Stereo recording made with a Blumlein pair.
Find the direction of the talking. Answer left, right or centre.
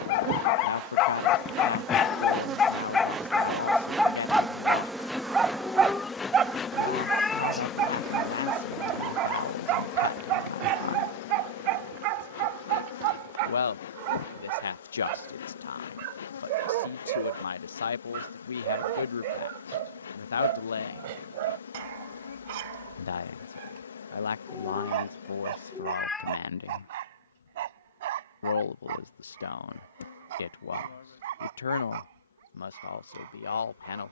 left.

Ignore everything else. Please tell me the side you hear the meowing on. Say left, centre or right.
centre.